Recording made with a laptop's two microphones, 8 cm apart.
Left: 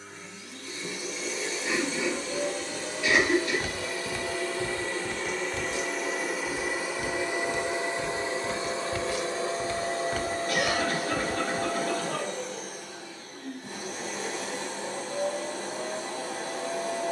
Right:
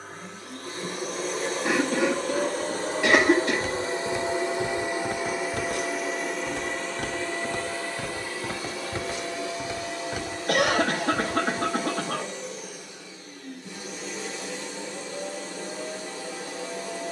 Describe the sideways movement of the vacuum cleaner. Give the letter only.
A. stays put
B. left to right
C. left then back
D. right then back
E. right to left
E.